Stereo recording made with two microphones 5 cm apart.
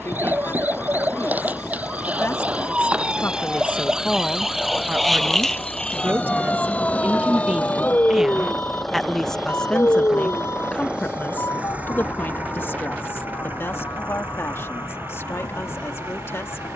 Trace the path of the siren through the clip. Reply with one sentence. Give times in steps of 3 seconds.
In this clip you hear the siren on the right from 0 s, in the centre from 3 s and on the left from 6 s.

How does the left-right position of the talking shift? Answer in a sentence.
You can hear the talking go right and come back.